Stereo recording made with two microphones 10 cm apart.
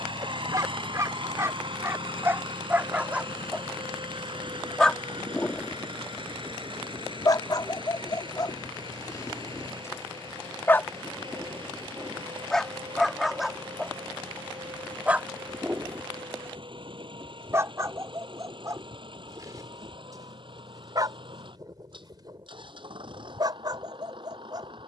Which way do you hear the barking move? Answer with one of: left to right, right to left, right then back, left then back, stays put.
left then back.